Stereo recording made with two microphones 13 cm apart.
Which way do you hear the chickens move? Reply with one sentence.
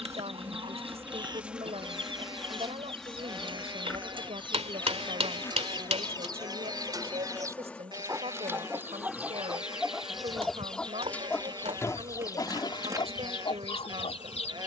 You can hear the chickens move from right to left.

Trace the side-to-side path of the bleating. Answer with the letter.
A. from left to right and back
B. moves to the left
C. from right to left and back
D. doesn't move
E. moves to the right
D.